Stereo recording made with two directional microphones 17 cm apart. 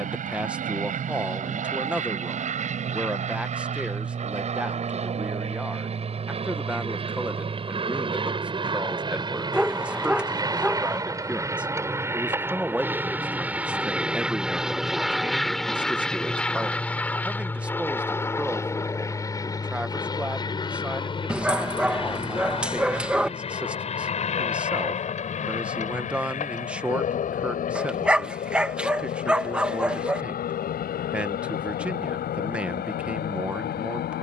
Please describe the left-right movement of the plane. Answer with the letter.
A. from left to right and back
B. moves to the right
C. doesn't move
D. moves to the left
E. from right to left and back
D.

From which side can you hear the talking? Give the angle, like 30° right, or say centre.
10° right.